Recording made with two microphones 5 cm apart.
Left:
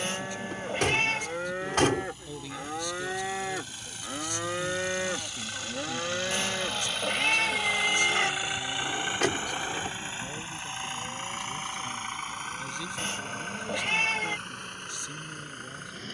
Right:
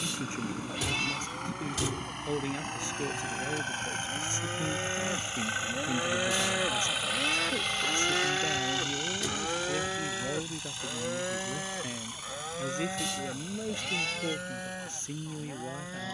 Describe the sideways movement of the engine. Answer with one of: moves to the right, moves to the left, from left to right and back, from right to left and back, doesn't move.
moves to the left.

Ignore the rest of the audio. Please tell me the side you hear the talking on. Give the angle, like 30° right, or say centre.
30° right.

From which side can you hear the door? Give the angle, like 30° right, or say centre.
60° left.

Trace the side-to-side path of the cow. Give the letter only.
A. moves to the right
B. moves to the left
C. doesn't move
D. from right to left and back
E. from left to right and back
A.